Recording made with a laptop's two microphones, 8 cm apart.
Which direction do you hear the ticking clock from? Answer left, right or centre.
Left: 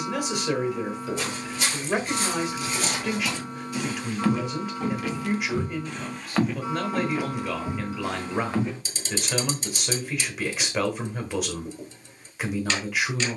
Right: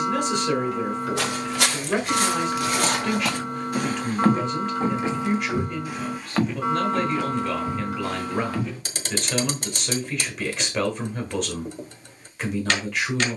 right.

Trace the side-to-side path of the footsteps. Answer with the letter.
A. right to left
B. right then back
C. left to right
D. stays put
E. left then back
A.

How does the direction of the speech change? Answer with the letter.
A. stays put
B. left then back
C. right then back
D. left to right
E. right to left
A.